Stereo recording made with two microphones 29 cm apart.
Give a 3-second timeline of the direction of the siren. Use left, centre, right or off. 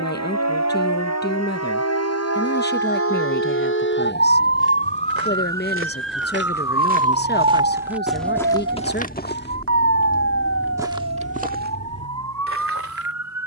left, left, right, right, right.